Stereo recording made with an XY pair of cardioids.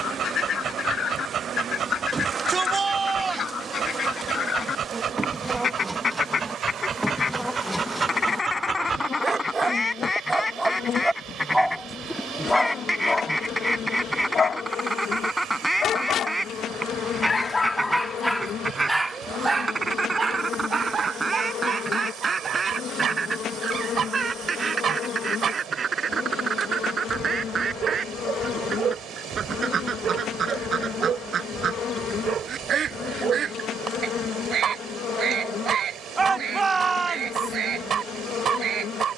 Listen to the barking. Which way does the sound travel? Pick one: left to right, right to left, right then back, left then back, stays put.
left then back.